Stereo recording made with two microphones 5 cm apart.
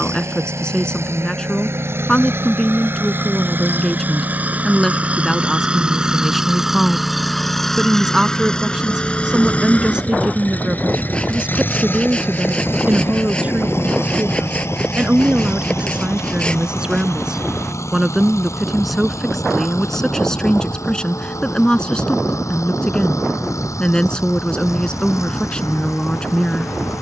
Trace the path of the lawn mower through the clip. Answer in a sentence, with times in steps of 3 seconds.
In this clip you hear the lawn mower on the right from 0 s, in the centre from 6 s and on the left from 9 s.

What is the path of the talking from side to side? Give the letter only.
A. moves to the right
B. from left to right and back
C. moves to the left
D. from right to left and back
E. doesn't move
B.